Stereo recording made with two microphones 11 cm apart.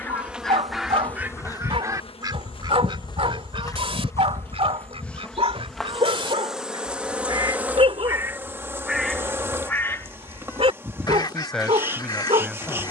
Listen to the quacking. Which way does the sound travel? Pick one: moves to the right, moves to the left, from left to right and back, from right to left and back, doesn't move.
from left to right and back.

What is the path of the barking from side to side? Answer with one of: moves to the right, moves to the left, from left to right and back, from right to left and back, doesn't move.
doesn't move.